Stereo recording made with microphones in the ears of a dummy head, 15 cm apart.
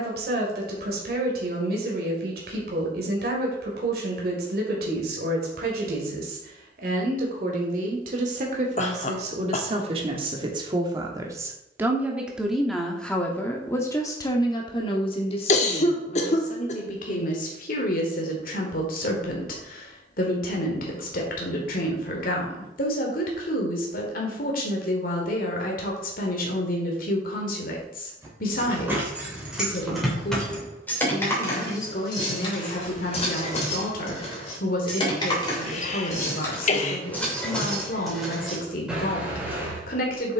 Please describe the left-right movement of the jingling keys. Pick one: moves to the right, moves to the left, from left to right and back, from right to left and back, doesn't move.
from right to left and back.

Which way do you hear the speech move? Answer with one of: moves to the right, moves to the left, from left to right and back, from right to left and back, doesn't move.
moves to the left.